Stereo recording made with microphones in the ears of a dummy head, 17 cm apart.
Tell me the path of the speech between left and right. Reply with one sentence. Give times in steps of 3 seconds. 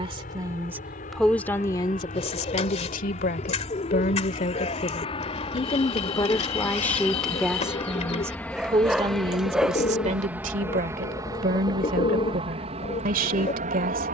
In this clip you hear the speech in the centre from 0 s, on the left from 3 s, in the centre from 6 s and on the right from 9 s.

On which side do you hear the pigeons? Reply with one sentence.
In this clip you hear the pigeons on the left.